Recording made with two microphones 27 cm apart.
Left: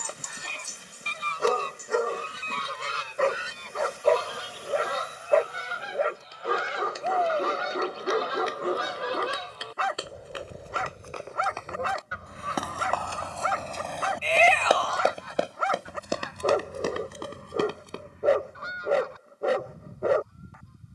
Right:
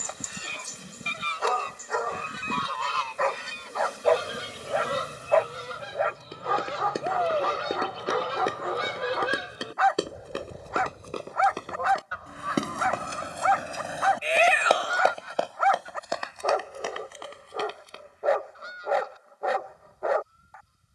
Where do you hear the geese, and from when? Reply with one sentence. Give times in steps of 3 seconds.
In this clip you hear the geese on the left from 0 s, on the right from 3 s, in the centre from 9 s and on the left from 12 s.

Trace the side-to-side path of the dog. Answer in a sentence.
In this clip you hear the dog stay in one place.